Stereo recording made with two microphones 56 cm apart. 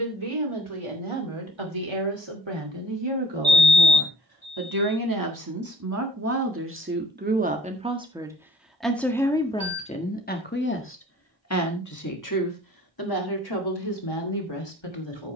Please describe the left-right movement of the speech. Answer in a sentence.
You can hear the speech move from right to left.